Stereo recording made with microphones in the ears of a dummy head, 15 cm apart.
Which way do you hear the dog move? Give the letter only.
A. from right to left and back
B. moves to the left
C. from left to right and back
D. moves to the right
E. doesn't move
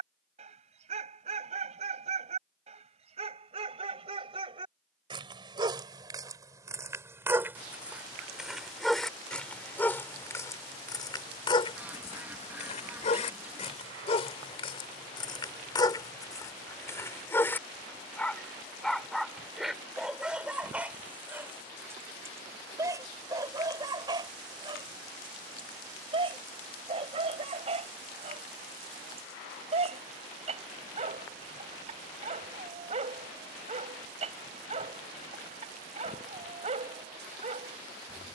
A.